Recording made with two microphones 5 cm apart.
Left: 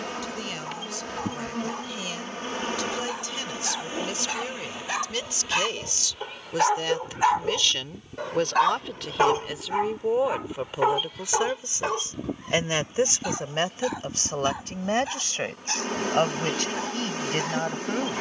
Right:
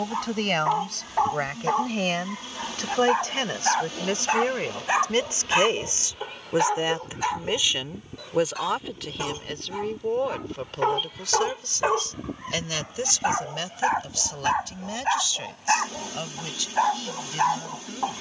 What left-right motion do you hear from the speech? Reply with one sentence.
In this clip you hear the speech travel towards the left.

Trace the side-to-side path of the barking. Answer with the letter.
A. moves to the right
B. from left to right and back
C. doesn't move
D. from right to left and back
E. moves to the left
D.